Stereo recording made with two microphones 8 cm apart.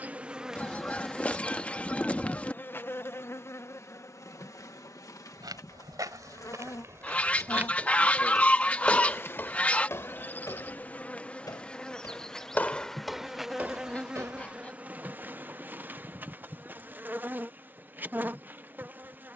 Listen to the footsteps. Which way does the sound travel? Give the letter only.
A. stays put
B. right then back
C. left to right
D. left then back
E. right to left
D.